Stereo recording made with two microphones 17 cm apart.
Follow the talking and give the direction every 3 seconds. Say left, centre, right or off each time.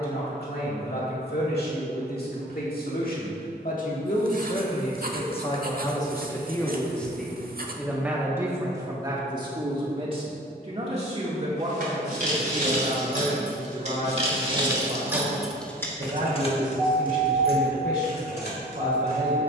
left, left, centre, right, right, right, right.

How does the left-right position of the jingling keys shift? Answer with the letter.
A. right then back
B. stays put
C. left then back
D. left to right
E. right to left
E.